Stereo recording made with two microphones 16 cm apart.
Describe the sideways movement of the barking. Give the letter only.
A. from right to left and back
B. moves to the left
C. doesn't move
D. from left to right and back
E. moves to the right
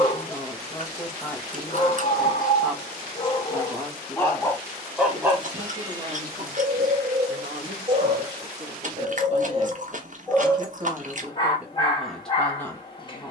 D.